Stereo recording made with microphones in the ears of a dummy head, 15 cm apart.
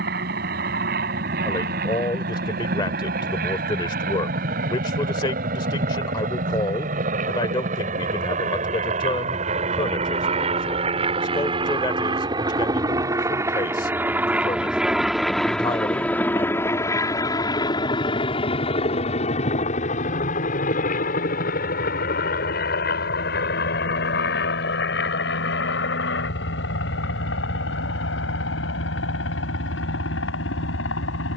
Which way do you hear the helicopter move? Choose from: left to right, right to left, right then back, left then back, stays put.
right to left.